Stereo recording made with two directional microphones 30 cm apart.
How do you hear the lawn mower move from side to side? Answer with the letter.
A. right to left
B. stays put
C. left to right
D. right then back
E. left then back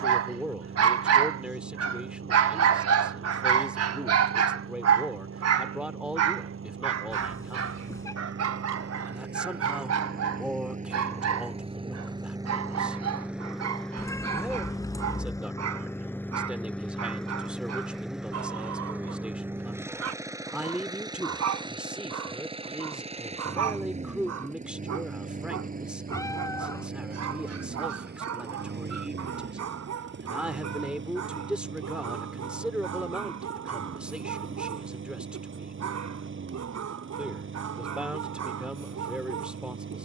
E.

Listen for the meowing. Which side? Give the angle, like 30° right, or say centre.
10° left.